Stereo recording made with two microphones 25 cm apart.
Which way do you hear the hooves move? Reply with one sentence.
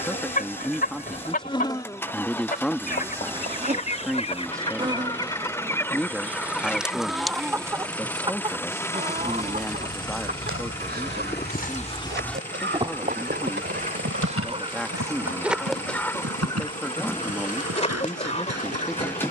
You can hear the hooves move from left to right.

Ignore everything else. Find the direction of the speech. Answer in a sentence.
In this clip you hear the speech in the centre.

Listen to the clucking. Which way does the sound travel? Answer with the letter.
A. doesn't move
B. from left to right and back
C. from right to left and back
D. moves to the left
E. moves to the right
B.